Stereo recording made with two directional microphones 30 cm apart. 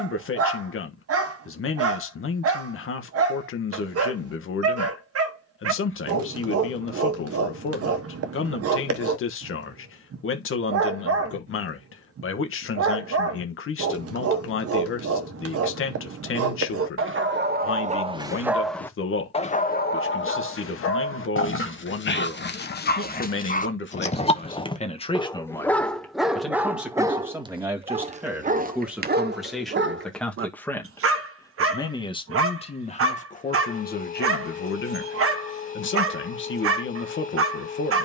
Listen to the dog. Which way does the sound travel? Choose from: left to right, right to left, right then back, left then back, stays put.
left then back.